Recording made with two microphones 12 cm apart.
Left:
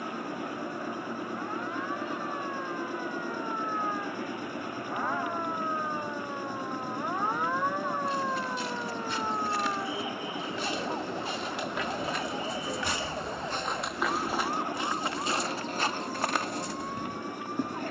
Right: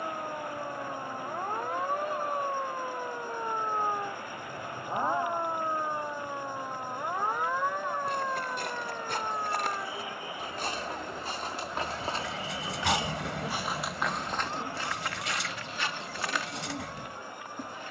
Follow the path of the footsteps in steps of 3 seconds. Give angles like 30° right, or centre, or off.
off, off, 60° right, 50° right, 10° right, 40° left.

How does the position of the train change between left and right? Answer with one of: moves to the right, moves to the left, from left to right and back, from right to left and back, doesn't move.
doesn't move.